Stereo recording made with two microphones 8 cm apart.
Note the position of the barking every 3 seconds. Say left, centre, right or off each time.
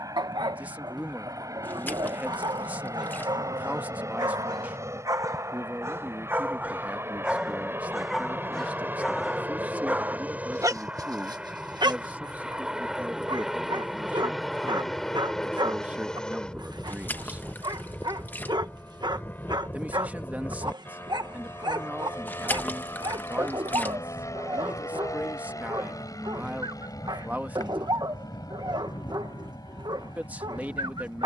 right, right, centre, right, right, right, right, right, right, right, right.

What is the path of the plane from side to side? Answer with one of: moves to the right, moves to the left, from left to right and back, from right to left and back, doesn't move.
moves to the left.